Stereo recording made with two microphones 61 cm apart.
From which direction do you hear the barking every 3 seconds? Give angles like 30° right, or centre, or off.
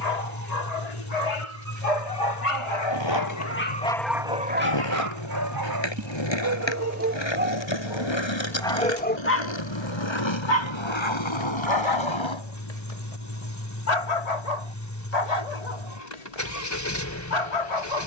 70° left, 10° right, 10° right, 40° left, 70° left, 80° left.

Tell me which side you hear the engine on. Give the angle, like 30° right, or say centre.
30° left.